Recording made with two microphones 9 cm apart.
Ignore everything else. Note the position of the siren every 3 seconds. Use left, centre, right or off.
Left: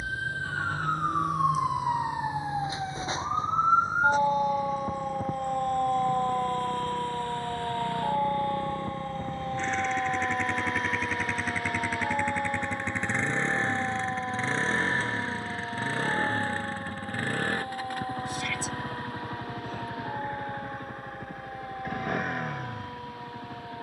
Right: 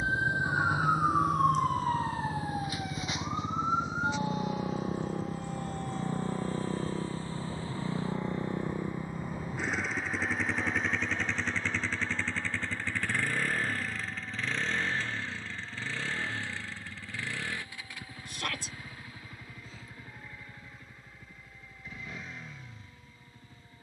centre, left, left, left, left, left, left, left.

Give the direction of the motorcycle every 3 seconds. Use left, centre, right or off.
right, right, right, centre, left, left, left, left.